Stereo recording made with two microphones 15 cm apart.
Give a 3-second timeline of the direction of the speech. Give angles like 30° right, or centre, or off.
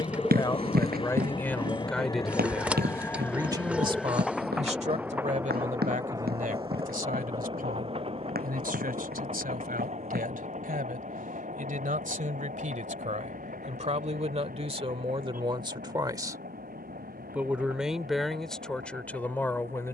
10° left, 40° right, 70° right, 70° right, 50° right, 20° right, 10° left.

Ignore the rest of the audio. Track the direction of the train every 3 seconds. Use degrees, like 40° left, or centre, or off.
30° left, centre, 30° right, 50° right, 60° right, 60° right, 70° right.